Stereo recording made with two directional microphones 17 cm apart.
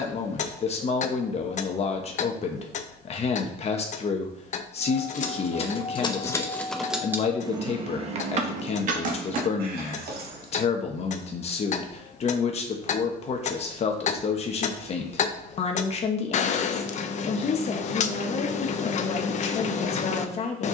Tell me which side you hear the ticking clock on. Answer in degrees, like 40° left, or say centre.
40° left.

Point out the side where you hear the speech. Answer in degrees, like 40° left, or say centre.
40° left.